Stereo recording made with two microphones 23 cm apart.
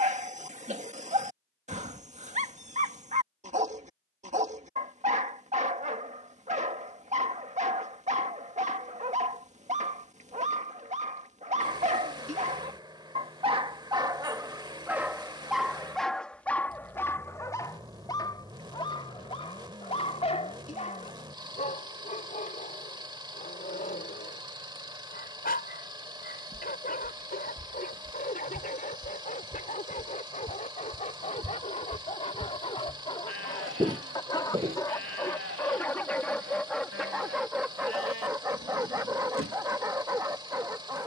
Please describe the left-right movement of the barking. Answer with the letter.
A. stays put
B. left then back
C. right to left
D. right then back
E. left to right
B.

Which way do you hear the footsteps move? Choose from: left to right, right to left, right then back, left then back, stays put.
left to right.